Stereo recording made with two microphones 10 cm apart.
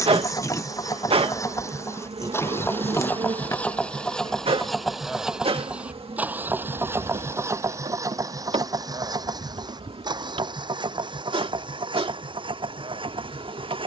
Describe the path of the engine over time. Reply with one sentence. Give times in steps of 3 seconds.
You can hear the engine on the left from 0 s, in the centre from 3 s and on the right from 6 s.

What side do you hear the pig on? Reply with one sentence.
In this clip you hear the pig on the left.